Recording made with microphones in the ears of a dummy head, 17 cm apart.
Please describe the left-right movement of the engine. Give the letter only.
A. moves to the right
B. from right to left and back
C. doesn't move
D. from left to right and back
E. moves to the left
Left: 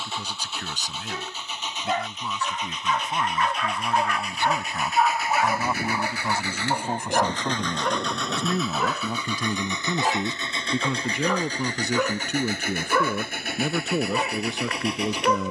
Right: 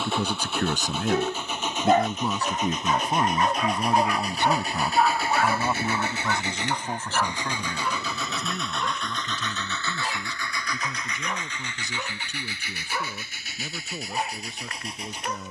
E.